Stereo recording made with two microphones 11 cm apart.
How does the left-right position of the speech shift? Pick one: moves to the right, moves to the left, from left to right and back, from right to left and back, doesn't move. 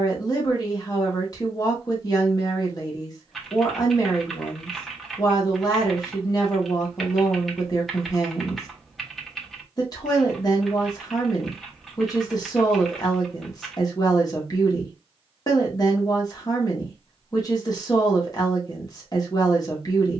doesn't move.